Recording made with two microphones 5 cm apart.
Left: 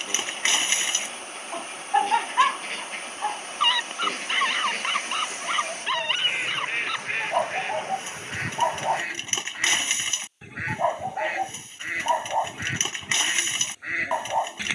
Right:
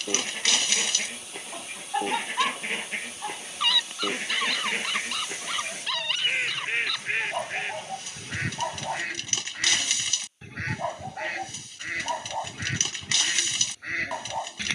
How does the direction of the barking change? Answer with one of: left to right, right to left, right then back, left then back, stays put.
stays put.